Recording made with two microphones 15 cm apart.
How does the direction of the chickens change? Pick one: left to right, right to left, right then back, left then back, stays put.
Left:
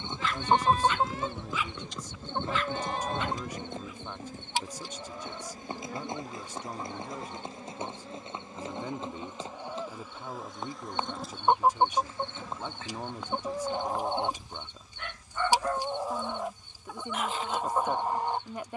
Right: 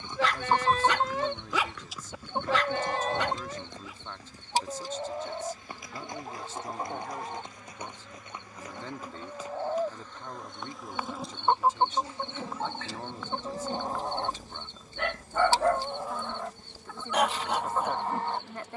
right then back.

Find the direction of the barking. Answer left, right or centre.
right.